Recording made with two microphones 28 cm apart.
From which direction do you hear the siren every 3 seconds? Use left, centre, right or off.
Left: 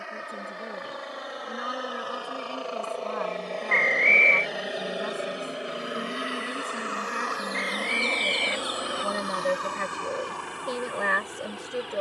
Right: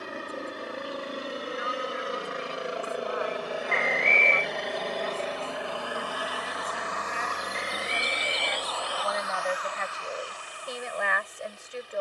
right, right, right, left.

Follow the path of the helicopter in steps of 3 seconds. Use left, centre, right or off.
right, centre, left, left.